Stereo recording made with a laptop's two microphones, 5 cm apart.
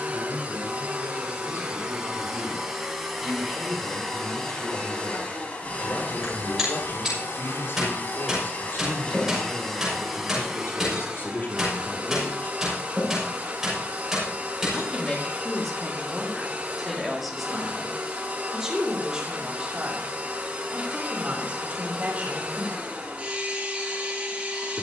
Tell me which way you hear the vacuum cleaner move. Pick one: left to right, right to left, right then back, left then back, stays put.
left then back.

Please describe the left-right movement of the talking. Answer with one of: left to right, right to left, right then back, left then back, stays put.
left to right.